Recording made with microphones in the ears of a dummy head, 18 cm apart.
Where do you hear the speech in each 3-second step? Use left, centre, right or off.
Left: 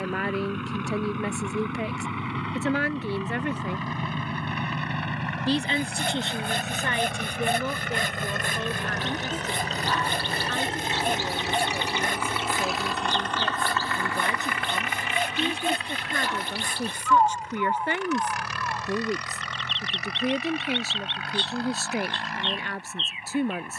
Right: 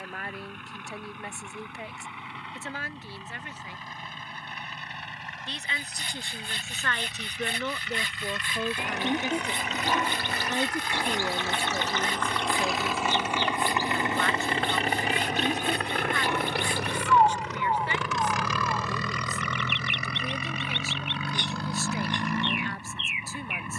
left, left, centre, centre, centre, left, left, left.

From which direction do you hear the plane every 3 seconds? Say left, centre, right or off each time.
left, left, left, left, centre, right, right, right.